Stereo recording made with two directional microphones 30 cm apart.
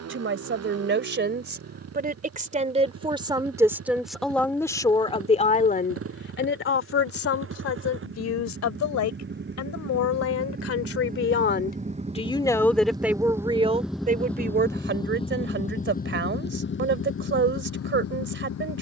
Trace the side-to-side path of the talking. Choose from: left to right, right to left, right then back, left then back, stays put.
left then back.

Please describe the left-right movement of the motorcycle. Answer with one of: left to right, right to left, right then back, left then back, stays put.
right to left.